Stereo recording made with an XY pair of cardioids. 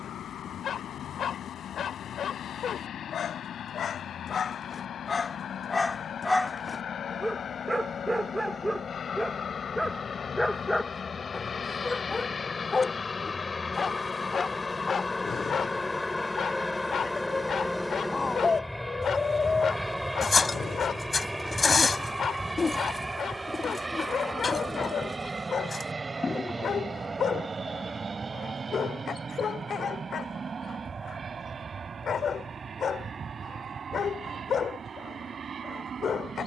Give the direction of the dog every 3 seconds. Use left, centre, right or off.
left, left, centre, centre, left, left, left, left, left, left, left, left.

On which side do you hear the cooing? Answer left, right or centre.
left.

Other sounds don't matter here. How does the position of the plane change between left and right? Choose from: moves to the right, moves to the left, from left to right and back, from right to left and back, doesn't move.
moves to the right.